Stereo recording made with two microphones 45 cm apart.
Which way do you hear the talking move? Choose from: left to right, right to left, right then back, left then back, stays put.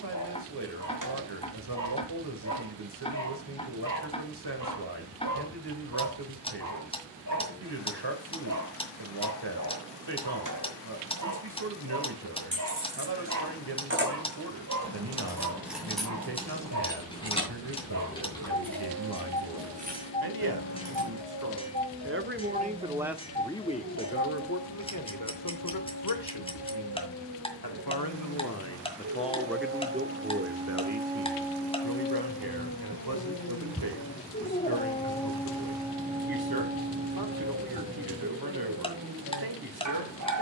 left then back.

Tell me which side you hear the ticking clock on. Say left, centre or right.
centre.